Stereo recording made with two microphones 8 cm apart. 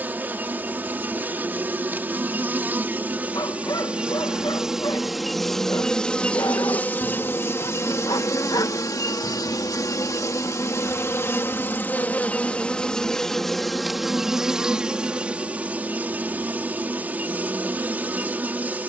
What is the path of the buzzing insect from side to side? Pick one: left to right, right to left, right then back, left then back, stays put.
left then back.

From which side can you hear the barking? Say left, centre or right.
left.